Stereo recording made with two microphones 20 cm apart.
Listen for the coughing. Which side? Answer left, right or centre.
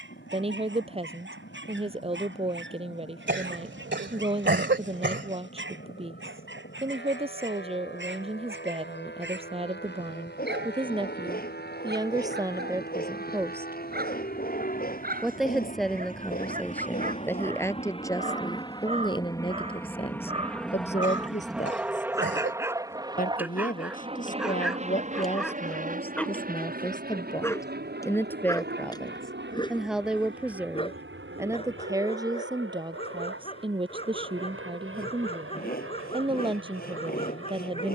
right.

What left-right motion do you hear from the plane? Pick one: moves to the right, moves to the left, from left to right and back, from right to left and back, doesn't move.
moves to the right.